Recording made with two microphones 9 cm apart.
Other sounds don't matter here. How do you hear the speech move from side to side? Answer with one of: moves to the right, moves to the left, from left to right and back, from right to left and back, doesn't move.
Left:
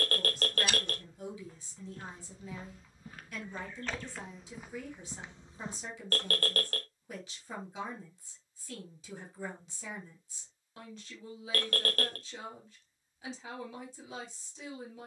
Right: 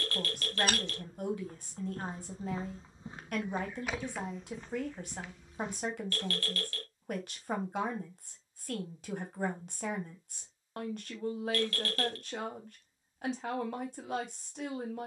doesn't move.